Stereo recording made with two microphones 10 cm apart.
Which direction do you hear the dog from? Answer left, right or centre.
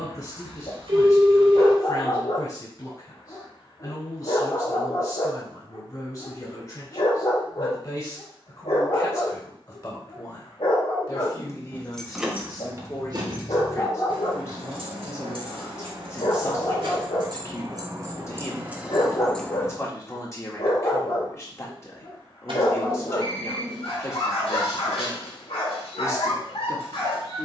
left.